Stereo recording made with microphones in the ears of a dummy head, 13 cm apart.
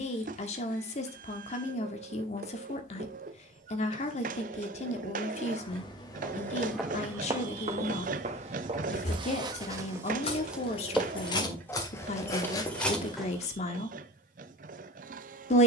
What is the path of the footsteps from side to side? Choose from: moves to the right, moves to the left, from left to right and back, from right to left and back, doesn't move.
from left to right and back.